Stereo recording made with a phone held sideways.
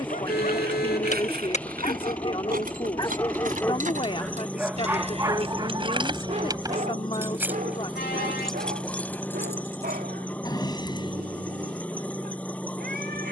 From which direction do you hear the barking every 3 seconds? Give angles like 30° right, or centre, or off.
40° left, 10° right, 50° right, 70° right, 80° right.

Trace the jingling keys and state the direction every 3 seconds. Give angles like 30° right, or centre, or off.
70° right, 50° right, 10° right, 20° left, off.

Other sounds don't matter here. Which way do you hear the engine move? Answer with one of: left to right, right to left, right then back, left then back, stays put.
stays put.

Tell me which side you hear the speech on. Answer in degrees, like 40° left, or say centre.
30° left.